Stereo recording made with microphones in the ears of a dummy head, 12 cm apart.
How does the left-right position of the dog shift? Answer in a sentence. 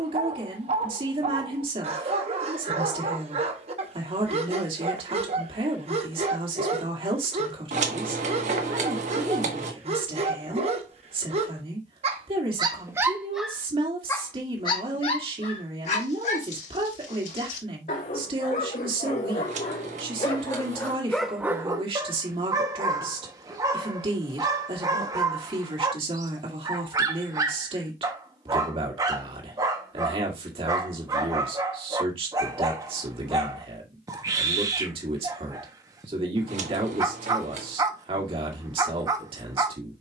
In this clip you hear the dog go left and come back.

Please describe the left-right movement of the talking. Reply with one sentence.
In this clip you hear the talking stay in one place.